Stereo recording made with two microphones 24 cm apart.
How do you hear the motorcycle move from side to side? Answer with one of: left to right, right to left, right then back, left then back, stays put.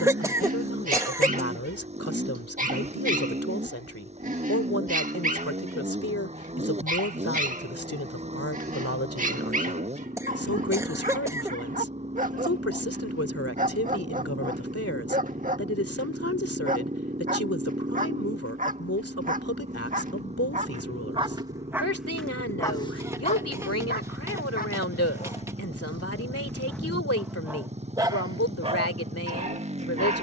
stays put.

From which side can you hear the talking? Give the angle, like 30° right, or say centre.
80° left.